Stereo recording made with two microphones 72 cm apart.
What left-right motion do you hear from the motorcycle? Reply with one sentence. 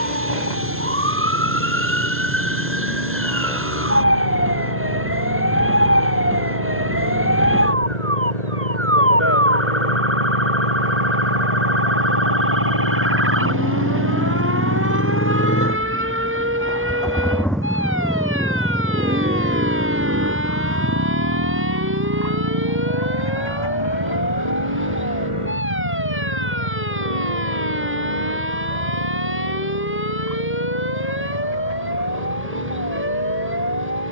You can hear the motorcycle move from left to right.